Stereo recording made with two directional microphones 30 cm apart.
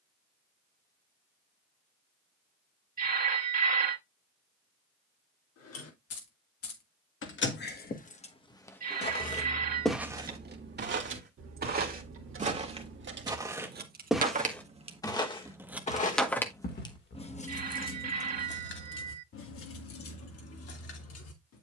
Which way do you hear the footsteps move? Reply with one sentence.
In this clip you hear the footsteps move from left to right and back again.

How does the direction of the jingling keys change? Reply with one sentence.
In this clip you hear the jingling keys move from left to right and back again.